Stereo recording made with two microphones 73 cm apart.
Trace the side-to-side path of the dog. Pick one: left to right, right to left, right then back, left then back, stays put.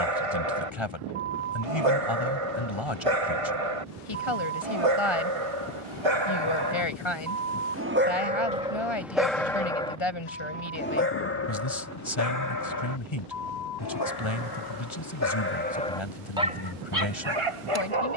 left then back.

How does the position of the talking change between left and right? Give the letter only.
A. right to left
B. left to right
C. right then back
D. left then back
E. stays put
E.